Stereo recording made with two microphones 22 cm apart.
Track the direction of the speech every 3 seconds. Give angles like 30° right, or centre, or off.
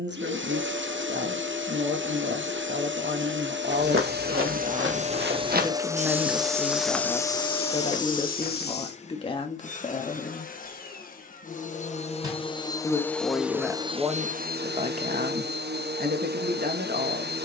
50° right, 30° right, 10° left, 30° left, 10° right, 40° right.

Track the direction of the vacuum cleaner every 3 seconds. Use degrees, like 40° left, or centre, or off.
60° right, 40° right, 10° left, 40° left, 10° right, 50° right.